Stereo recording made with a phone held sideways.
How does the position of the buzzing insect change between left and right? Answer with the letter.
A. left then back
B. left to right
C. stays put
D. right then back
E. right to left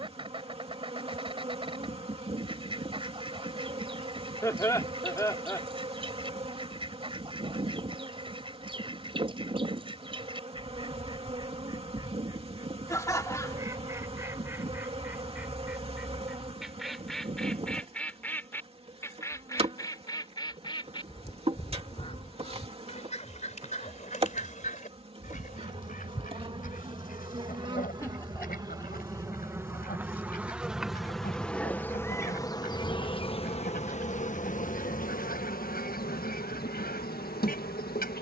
E.